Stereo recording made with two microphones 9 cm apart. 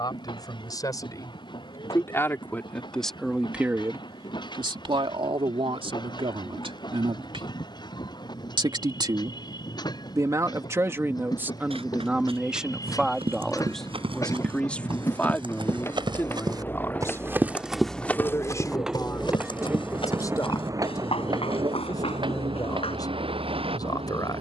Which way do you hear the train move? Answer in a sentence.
In this clip you hear the train go from the left side to the right.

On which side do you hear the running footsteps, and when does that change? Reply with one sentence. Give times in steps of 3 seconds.
In this clip you hear the running footsteps not at all from 0 s, on the right from 9 s and on the left from 18 s.